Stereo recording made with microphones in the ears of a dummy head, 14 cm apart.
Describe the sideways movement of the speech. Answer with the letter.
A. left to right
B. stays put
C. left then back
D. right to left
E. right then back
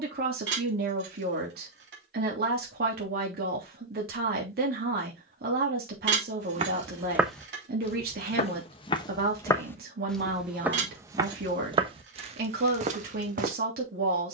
B.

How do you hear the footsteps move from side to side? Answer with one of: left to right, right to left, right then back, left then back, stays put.
left then back.